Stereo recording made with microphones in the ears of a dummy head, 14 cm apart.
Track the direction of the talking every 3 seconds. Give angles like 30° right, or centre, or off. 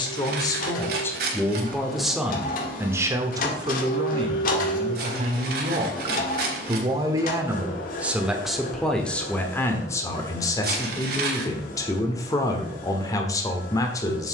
10° left, 30° right, 10° right, 20° left, 20° left.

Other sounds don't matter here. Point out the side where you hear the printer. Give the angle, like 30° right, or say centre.
60° left.